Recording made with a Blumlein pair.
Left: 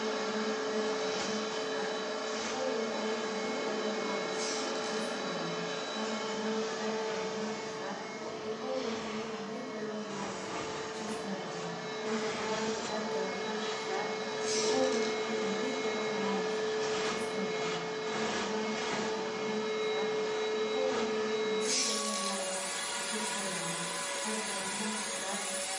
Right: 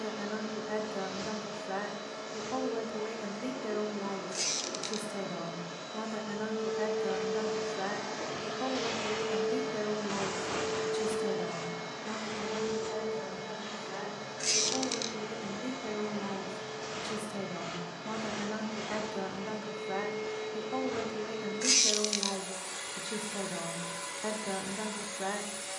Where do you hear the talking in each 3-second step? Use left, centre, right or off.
right, right, right, right, centre, centre, right, right, right.